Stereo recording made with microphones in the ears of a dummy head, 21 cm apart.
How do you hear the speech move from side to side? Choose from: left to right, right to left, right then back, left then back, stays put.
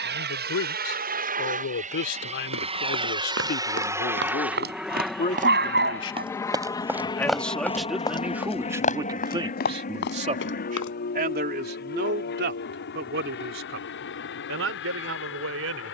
left to right.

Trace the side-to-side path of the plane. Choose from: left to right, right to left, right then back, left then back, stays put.
right to left.